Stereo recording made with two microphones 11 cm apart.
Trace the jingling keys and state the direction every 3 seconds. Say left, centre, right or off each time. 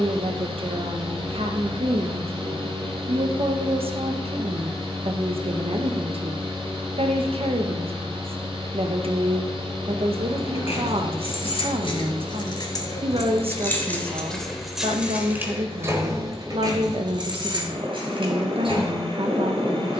off, off, off, left, left, right, right.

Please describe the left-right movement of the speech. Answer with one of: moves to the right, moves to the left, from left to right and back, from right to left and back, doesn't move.
doesn't move.